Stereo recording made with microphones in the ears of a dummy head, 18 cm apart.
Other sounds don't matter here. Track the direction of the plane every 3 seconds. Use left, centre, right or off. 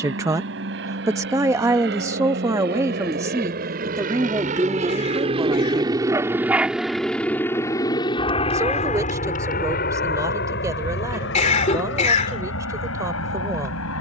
right, right, centre, left, left.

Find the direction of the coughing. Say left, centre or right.
left.